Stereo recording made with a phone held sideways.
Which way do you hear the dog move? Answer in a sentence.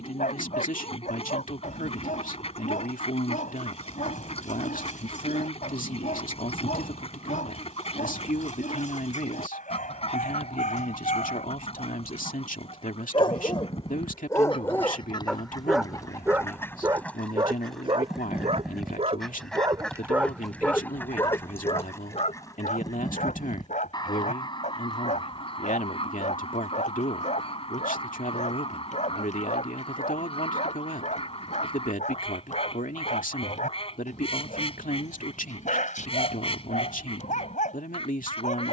You can hear the dog go right and come back.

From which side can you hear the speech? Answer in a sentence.
You can hear the speech on the left.